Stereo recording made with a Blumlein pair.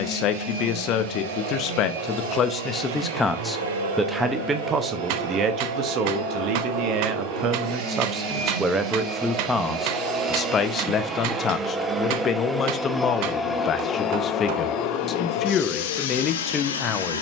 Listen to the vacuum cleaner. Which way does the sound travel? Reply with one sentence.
In this clip you hear the vacuum cleaner travel towards the left.